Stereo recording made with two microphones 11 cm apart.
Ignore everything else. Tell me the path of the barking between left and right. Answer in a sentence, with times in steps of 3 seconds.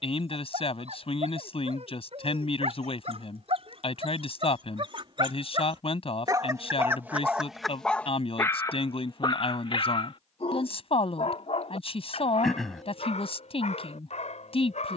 In this clip you hear the barking on the right from 0 s, in the centre from 6 s and on the left from 9 s.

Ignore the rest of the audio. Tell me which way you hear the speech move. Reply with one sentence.
In this clip you hear the speech stay in one place.